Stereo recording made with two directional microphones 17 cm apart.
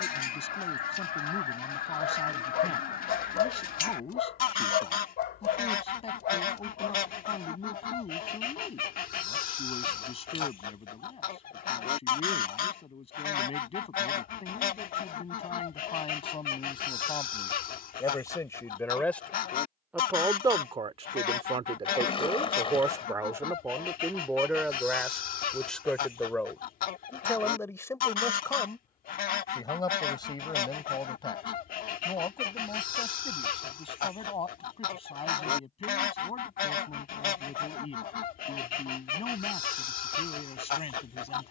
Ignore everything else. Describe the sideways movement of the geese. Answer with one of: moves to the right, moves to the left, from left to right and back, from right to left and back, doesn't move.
doesn't move.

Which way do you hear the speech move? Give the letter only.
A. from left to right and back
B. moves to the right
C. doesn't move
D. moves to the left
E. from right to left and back
A.